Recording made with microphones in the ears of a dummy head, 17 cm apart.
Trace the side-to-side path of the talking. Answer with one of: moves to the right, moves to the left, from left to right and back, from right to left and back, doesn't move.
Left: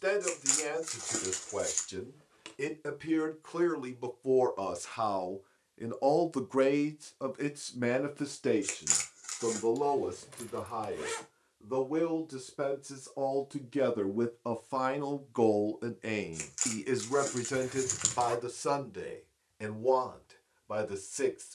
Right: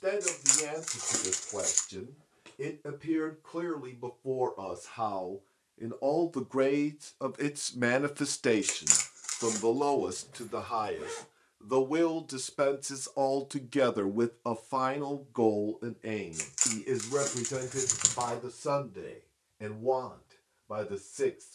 from left to right and back.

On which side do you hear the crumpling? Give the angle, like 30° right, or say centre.
20° right.